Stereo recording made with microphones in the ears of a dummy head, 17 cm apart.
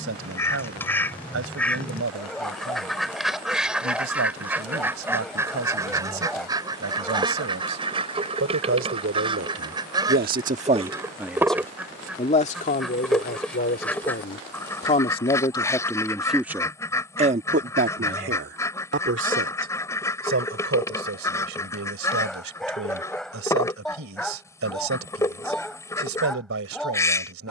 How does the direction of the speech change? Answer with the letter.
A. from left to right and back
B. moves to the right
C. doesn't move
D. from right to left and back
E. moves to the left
D.